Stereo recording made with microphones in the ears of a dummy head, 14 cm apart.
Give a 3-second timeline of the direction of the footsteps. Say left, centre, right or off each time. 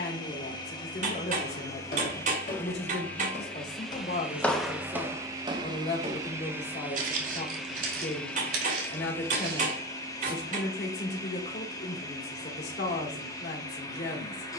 left, centre, right, right, off.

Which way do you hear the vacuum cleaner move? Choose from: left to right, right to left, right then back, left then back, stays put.
right then back.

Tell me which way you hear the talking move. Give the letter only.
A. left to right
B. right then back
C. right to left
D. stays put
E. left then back
D.